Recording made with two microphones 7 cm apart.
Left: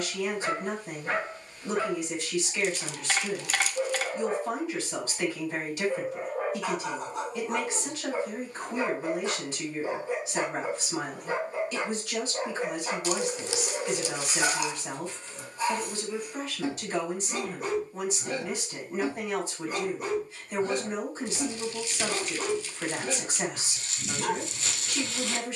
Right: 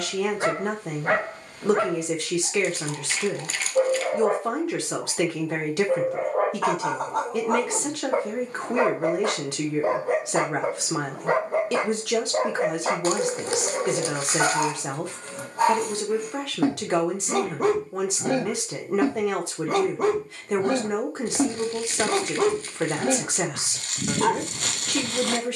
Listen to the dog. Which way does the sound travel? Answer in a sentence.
You can hear the dog stay in one place.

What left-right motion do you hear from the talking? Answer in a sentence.
In this clip you hear the talking stay put.